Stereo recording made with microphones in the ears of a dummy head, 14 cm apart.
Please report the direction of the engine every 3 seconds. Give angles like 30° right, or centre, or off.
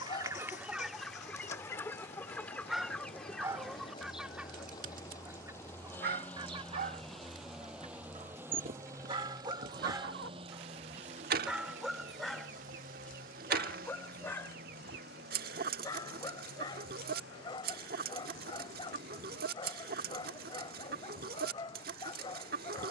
40° left, 20° left, centre, 30° right, 50° right, 70° right, 70° right, 80° right.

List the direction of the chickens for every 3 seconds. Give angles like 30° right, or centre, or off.
centre, 10° right, 40° right, 60° right, 60° right, 60° right, 60° right, 60° right.